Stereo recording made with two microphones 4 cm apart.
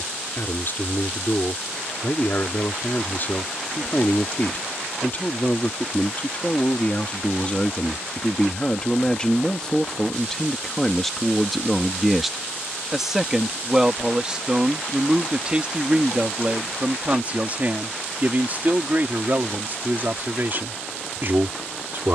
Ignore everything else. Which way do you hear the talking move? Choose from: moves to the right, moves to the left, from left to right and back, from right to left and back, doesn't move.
moves to the right.